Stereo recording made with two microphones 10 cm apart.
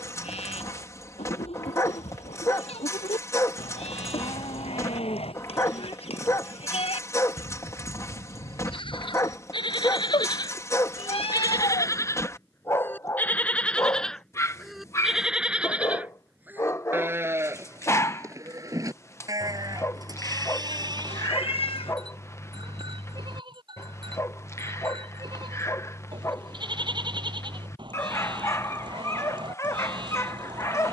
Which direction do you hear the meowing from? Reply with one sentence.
You can hear the meowing on the left.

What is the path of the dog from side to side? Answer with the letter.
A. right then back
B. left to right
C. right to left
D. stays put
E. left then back
D.